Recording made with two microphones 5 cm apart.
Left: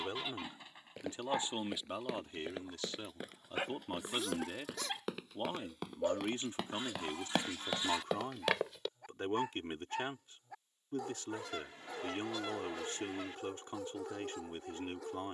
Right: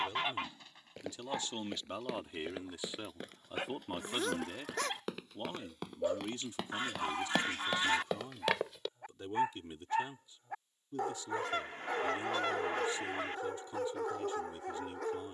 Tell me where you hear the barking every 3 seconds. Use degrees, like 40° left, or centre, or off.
10° left, 10° left, 10° right, 50° right, 60° right.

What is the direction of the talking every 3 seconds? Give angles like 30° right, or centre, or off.
20° left, 10° left, 50° left, 60° left, 60° left.